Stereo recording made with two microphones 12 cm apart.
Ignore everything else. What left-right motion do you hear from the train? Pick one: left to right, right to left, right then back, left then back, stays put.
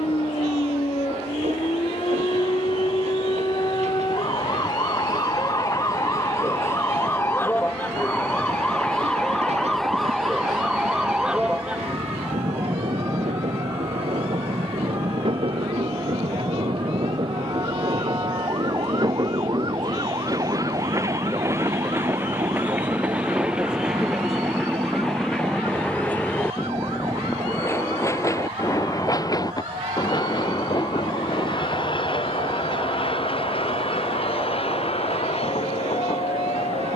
right to left.